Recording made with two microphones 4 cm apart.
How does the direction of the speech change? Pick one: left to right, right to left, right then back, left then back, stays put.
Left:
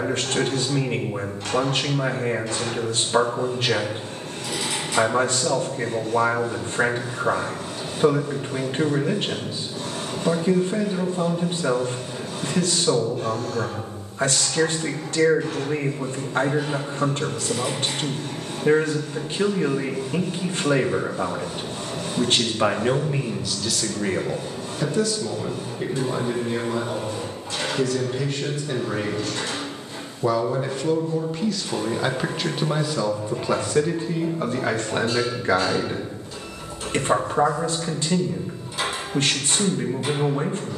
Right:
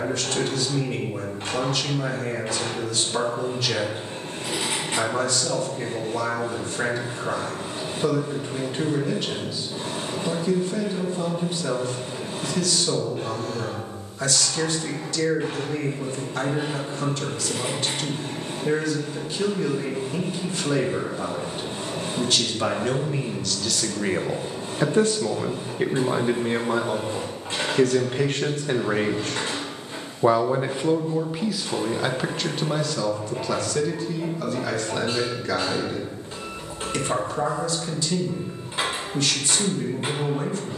right then back.